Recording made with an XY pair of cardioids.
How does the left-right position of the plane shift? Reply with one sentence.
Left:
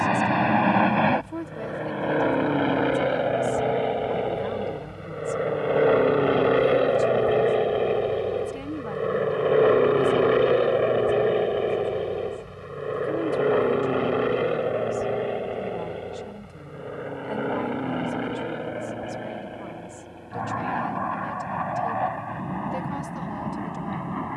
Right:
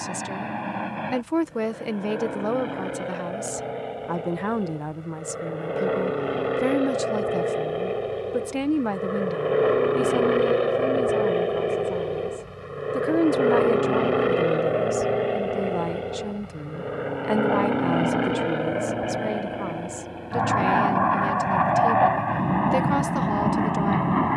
You can hear the plane travel towards the right.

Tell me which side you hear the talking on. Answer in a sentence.
You can hear the talking on the right.